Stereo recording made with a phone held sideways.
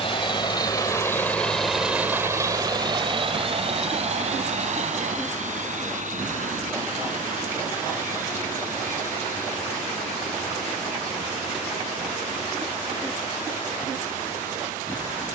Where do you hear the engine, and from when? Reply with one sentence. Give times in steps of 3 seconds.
In this clip you hear the engine in the centre from 0 s and on the right from 3 s.